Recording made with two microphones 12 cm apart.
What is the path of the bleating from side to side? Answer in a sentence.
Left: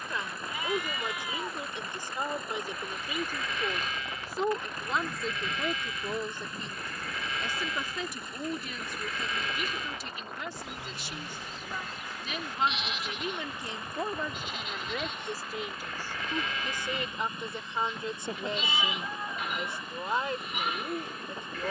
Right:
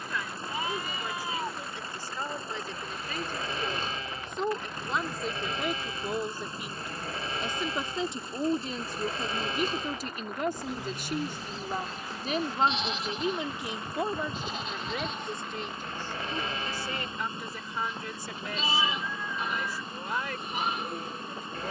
In this clip you hear the bleating stay in one place.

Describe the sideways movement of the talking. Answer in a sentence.
You can hear the talking move from left to right and back again.